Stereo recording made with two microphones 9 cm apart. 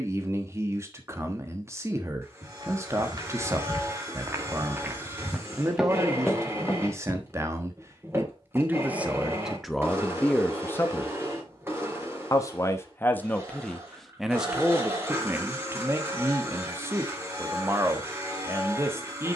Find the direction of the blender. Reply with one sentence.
In this clip you hear the blender on the right.